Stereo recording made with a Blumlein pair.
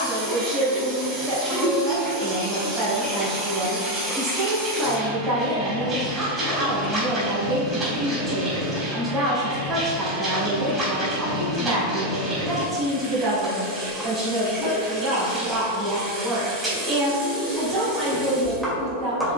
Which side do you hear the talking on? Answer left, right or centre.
right.